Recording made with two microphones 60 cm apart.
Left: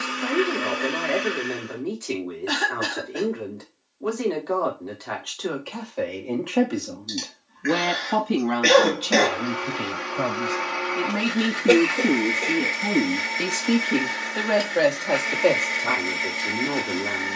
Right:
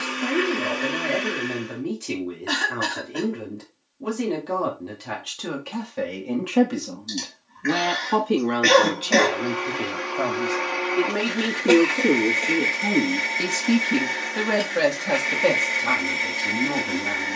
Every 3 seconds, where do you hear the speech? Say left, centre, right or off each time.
right, right, centre, left, centre, right.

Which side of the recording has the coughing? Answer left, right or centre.
right.